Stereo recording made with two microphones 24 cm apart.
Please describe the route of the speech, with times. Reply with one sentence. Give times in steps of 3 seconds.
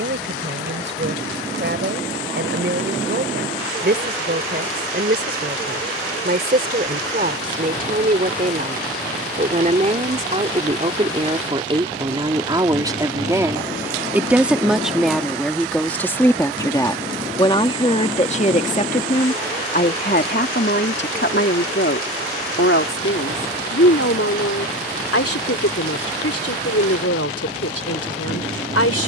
You can hear the speech on the right from 0 s, in the centre from 12 s and on the left from 18 s.